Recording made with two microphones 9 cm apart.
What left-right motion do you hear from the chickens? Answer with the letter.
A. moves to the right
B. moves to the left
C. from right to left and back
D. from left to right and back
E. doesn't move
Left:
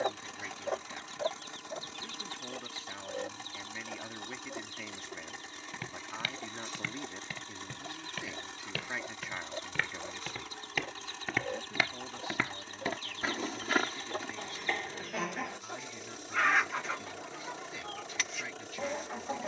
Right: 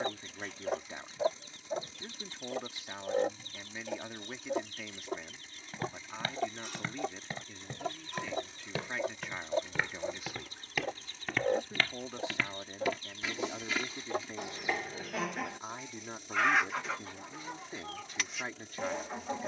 D.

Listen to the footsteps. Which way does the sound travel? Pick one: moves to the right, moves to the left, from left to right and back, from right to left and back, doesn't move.
moves to the left.